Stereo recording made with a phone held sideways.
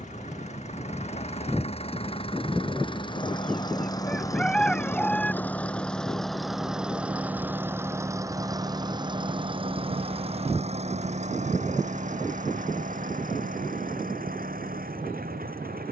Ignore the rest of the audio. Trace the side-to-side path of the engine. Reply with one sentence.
In this clip you hear the engine move to the right.